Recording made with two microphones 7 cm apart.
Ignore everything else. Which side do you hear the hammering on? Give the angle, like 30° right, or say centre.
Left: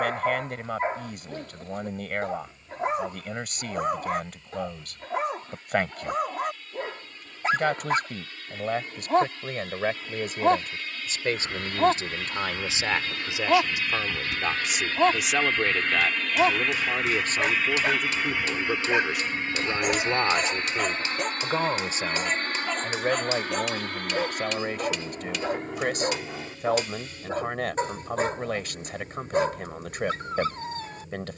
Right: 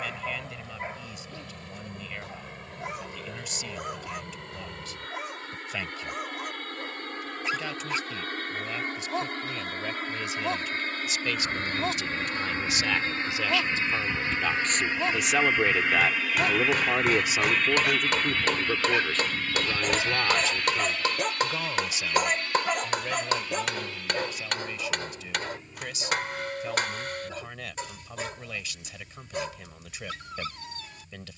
50° right.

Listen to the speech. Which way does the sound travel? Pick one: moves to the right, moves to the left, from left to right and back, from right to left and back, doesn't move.
from left to right and back.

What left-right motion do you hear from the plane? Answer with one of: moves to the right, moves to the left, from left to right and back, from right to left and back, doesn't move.
moves to the left.